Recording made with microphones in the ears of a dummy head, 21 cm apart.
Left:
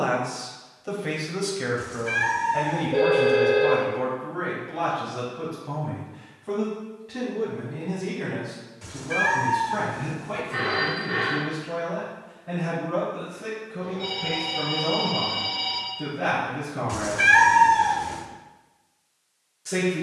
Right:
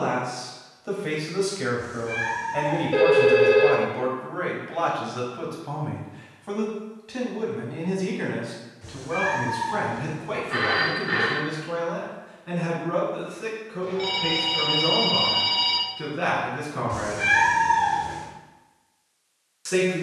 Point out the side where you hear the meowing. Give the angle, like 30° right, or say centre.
40° left.